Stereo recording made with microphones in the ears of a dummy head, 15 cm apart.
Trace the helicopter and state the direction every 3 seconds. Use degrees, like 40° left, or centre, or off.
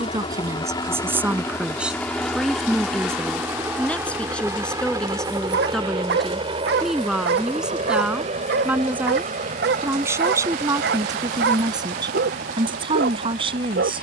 10° left, 20° right, 30° right, 40° right, 50° right.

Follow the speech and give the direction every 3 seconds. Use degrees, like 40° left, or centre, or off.
10° right, 10° left, centre, 20° right, 30° right.